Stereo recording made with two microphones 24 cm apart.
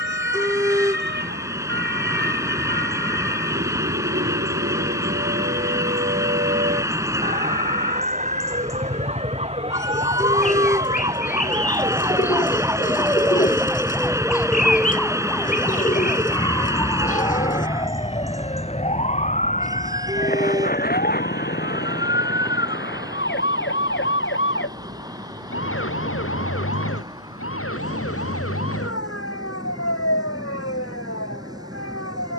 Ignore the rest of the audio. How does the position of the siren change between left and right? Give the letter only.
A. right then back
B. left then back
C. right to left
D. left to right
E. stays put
C.